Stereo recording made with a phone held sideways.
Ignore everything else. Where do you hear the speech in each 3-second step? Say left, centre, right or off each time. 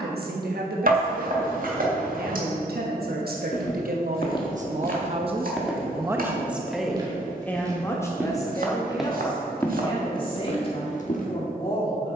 right, right, centre, left.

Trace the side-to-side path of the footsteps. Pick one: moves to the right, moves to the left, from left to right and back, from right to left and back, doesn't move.
from left to right and back.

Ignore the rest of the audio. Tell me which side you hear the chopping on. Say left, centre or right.
right.